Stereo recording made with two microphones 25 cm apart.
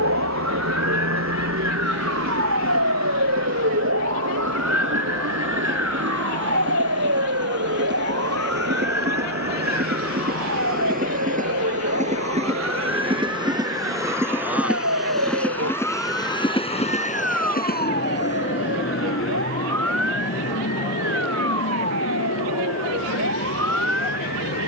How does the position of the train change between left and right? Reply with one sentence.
You can hear the train go from the right side to the left.